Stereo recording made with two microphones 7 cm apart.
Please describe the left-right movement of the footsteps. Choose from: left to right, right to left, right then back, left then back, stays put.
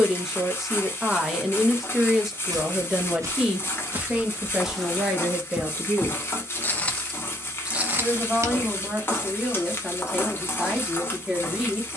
left then back.